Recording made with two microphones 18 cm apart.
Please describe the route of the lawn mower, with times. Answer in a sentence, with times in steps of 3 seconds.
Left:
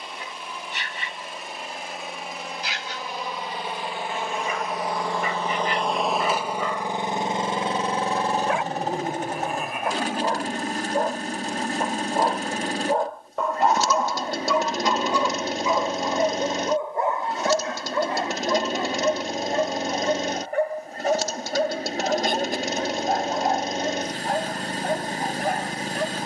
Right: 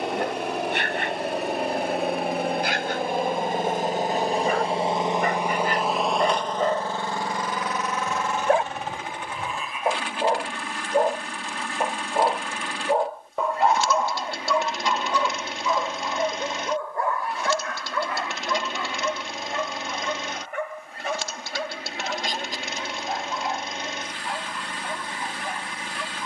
You can hear the lawn mower on the right from 0 s and on the left from 6 s.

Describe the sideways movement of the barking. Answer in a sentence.
You can hear the barking move to the left.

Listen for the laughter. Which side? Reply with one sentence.
In this clip you hear the laughter on the left.